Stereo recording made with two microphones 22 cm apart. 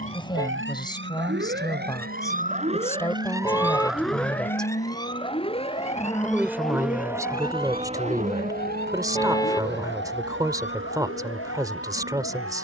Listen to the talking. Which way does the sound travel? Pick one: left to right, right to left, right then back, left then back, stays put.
left to right.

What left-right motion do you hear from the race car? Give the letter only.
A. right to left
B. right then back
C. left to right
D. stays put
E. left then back
C.